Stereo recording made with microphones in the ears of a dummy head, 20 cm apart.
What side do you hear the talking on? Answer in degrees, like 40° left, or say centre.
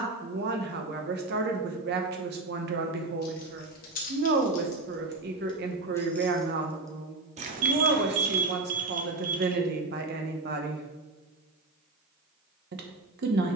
50° right.